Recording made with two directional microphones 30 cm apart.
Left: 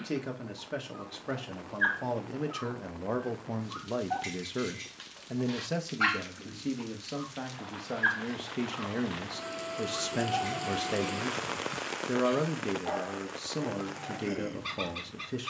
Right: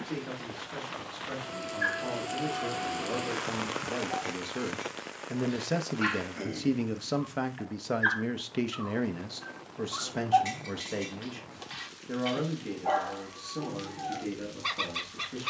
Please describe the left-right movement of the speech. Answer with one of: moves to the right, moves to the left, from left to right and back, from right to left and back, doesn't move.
from left to right and back.